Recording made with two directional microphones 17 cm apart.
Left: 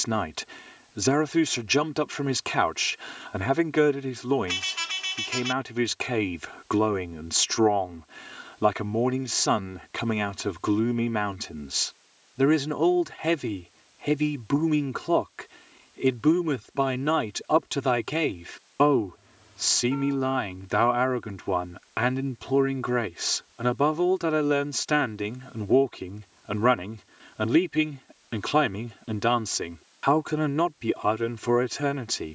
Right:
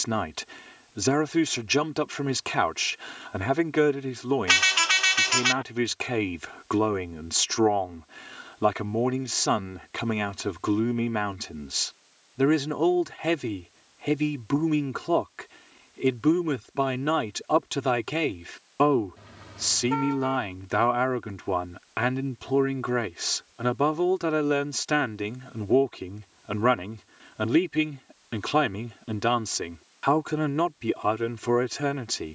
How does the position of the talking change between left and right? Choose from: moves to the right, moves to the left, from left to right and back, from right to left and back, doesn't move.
doesn't move.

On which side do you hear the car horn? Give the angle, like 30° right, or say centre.
60° right.